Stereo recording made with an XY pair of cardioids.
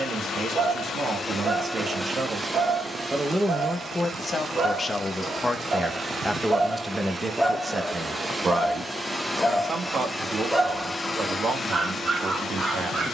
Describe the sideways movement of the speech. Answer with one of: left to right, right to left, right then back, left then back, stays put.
left then back.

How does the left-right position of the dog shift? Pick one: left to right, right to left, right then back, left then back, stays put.
left then back.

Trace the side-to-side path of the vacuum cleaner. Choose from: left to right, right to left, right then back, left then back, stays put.
right then back.